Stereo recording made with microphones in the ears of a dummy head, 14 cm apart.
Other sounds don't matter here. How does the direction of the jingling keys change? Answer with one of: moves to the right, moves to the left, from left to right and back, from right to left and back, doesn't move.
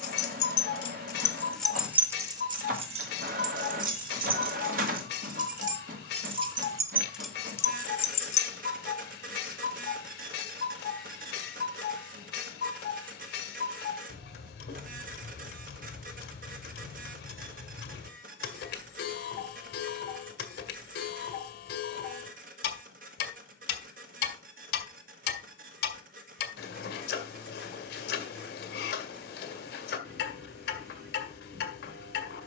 from left to right and back.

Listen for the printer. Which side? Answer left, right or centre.
right.